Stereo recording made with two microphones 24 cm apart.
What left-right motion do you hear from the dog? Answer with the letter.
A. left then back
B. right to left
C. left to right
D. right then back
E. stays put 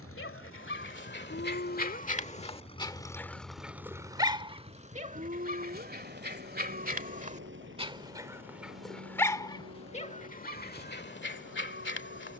D.